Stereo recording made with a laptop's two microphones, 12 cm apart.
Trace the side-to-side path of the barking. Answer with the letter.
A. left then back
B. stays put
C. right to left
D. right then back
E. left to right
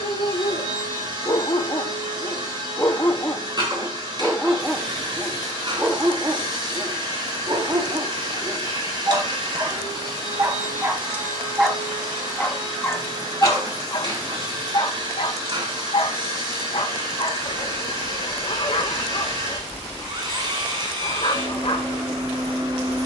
D.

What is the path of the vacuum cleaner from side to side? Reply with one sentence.
You can hear the vacuum cleaner stay put.